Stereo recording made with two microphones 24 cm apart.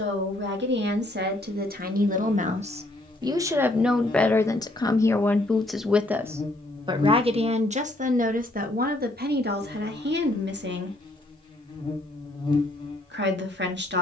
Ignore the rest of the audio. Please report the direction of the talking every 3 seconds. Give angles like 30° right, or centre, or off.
40° right, centre, 30° right, 50° right, 50° right.